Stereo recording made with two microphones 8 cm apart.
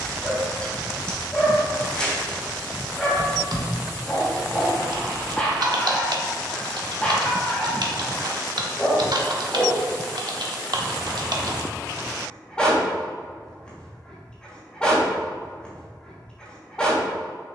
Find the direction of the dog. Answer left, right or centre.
centre.